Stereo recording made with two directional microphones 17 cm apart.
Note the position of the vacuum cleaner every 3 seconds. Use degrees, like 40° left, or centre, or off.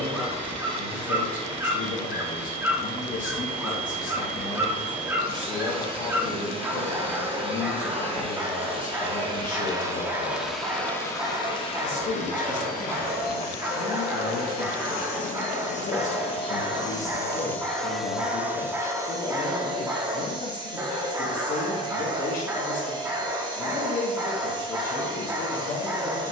30° right, 30° right, 30° right, centre, 50° left, 30° left, 20° right, 20° right, 20° right.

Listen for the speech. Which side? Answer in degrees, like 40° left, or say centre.
50° left.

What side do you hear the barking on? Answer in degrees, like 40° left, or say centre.
10° right.